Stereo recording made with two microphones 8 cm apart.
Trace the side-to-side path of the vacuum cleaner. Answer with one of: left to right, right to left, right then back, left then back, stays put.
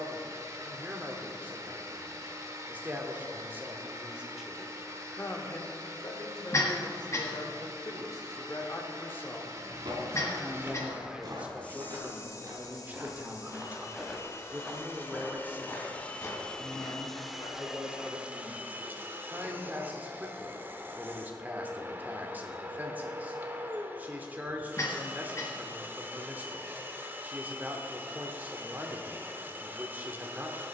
left then back.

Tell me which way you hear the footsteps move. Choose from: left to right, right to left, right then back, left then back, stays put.
right to left.